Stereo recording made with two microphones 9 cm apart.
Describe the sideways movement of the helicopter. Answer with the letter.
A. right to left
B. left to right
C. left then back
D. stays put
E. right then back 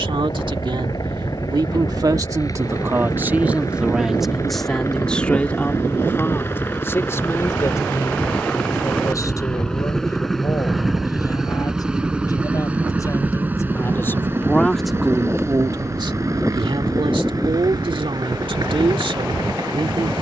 B.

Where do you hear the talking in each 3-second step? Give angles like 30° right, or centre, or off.
50° right, centre, 30° left, 40° left, 30° left, 60° right, 70° right.